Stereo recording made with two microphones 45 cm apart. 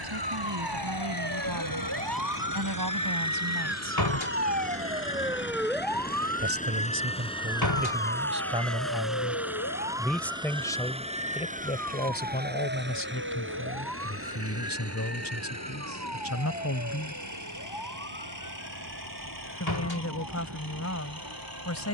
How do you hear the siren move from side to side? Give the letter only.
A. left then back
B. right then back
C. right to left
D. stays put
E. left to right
C.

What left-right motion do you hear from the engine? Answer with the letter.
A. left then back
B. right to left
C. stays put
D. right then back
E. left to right
E.